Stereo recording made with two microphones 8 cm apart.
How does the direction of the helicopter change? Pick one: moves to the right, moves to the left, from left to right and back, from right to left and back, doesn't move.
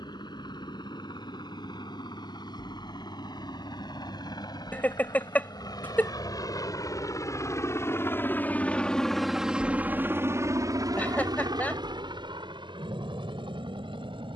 moves to the right.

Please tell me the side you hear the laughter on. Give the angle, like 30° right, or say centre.
20° left.